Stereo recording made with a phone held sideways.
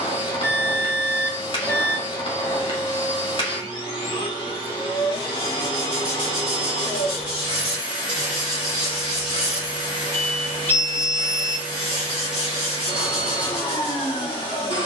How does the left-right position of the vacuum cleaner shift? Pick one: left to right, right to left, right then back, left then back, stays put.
stays put.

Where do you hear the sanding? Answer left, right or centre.
centre.